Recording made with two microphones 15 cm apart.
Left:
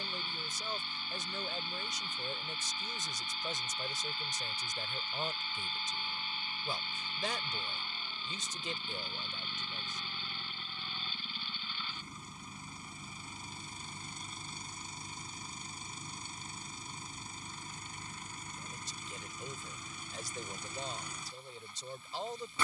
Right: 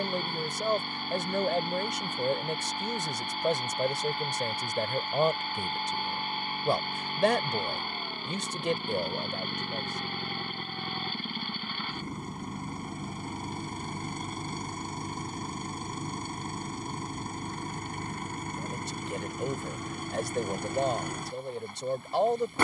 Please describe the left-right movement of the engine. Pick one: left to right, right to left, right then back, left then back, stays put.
stays put.